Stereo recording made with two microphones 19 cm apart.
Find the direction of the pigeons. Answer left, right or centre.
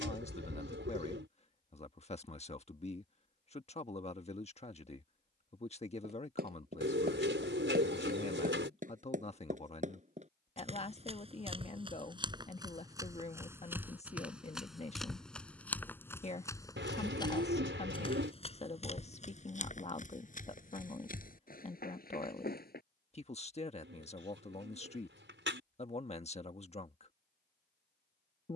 right.